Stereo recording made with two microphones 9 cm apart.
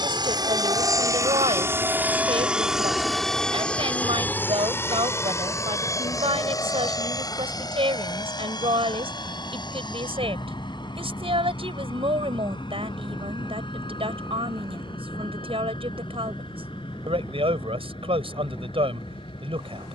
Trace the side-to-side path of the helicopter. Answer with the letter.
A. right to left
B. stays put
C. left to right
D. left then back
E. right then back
A.